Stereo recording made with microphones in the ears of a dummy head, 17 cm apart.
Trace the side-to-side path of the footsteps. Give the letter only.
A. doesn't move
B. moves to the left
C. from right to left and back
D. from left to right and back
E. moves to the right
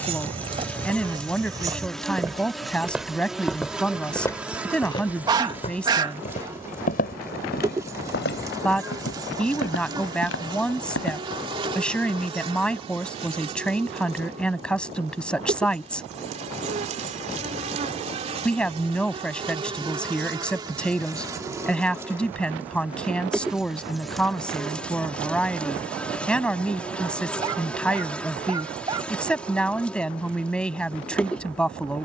B.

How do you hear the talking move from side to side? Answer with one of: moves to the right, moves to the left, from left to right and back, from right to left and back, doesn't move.
doesn't move.